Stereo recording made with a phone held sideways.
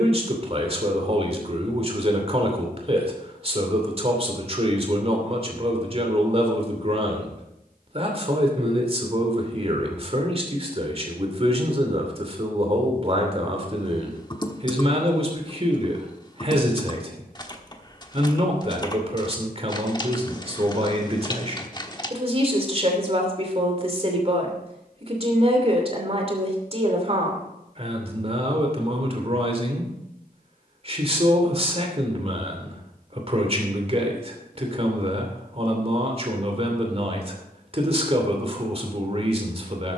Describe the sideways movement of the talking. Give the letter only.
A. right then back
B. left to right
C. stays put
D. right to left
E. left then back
C.